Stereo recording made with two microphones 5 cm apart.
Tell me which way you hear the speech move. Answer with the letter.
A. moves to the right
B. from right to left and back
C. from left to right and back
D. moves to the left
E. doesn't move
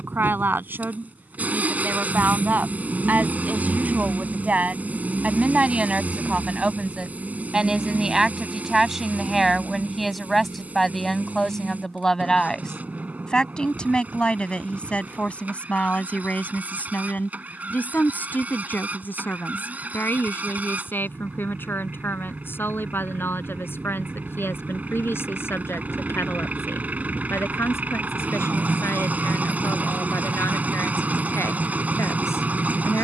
D.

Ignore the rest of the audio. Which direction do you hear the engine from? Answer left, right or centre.
right.